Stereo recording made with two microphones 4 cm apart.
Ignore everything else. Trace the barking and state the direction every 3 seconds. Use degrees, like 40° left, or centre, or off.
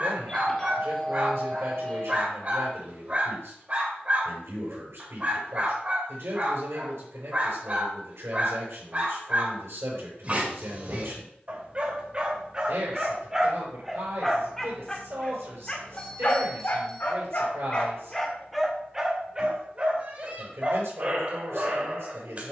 40° right, 40° right, 40° right, 40° right, 10° right, 30° left, 20° right, 40° right.